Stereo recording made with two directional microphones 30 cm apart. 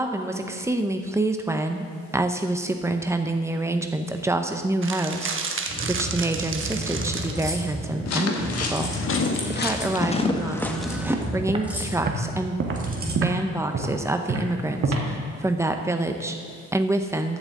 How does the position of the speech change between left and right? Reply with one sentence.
You can hear the speech stay in one place.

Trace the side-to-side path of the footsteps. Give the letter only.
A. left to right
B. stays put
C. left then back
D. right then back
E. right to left
A.